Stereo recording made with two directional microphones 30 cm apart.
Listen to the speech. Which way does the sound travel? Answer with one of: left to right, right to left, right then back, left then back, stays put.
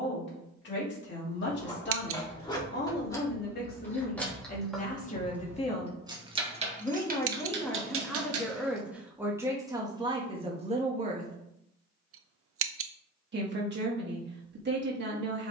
left to right.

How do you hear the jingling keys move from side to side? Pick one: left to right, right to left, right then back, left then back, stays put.
left to right.